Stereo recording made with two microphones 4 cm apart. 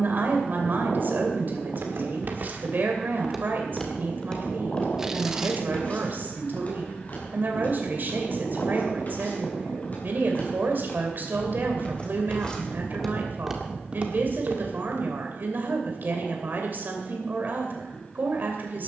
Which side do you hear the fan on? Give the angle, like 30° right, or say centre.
30° left.